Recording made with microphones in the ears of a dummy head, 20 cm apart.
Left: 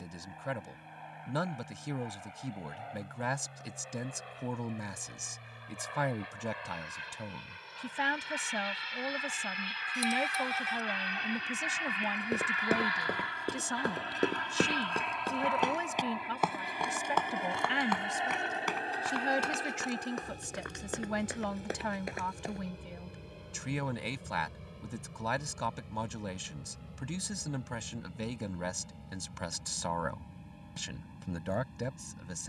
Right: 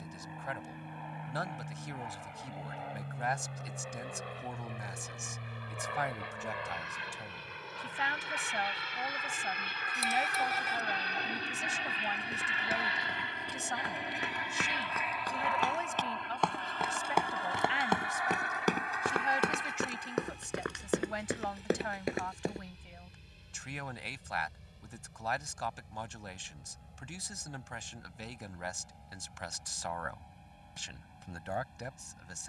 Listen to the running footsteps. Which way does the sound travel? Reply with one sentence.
In this clip you hear the running footsteps move to the right.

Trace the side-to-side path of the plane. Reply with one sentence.
You can hear the plane move to the left.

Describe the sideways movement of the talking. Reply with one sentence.
In this clip you hear the talking stay put.